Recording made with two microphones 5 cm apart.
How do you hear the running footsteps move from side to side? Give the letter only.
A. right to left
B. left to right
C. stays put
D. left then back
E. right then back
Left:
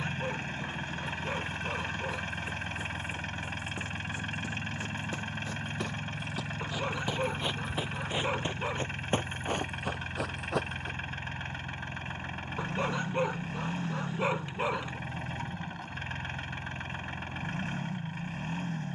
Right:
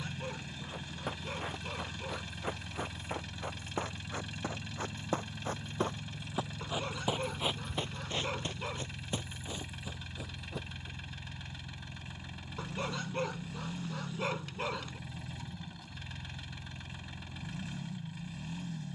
A.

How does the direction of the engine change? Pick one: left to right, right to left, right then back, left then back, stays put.
stays put.